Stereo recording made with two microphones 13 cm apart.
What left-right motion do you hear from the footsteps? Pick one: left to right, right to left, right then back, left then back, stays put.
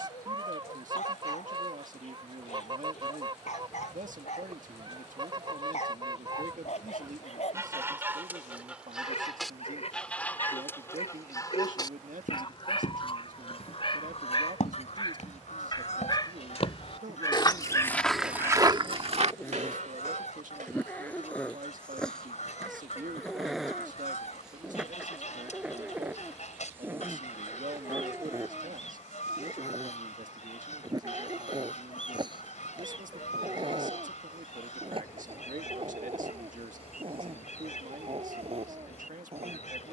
left to right.